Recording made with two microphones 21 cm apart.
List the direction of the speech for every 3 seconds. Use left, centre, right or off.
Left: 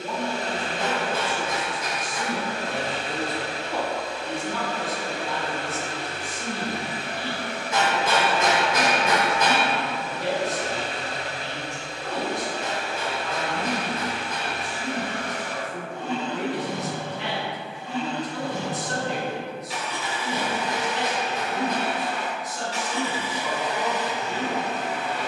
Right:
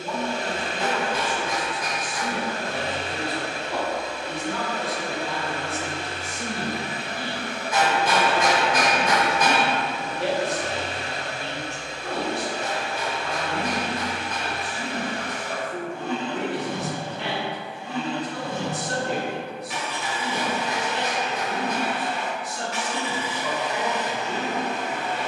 left, centre, right, right, right, right, right, right, right.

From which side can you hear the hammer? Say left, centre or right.
left.